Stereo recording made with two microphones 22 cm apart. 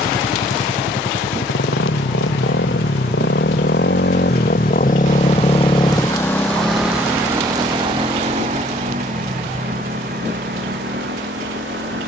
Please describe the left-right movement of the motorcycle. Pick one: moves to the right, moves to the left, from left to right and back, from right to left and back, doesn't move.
moves to the right.